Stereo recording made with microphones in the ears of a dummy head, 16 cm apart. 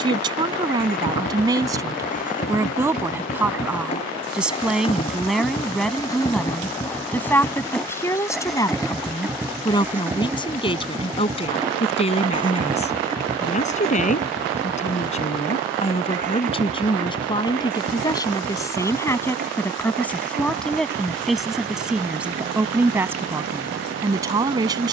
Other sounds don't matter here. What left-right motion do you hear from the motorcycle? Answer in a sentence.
In this clip you hear the motorcycle move to the right.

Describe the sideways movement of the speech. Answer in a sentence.
In this clip you hear the speech move from right to left and back again.